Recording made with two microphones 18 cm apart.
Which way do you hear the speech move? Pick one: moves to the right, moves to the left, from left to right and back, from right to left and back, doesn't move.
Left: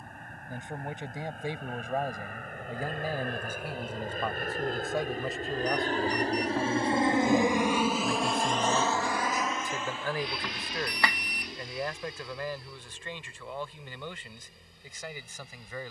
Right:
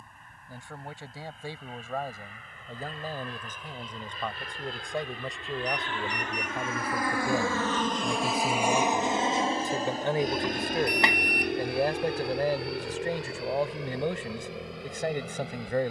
moves to the right.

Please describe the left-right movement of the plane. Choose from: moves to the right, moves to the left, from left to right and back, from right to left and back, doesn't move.
moves to the right.